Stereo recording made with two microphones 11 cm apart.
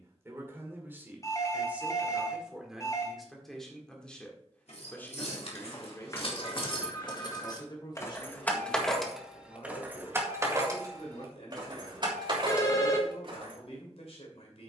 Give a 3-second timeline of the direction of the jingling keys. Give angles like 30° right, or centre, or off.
off, 60° left, 30° left, 20° right, 50° right.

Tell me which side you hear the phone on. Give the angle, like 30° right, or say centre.
30° left.